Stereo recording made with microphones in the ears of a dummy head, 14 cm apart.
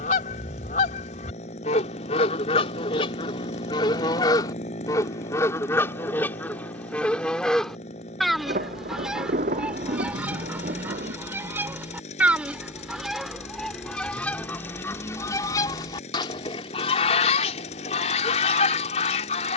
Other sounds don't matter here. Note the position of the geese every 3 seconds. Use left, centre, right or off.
left, left, centre, centre, centre, left, left.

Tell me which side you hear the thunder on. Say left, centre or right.
right.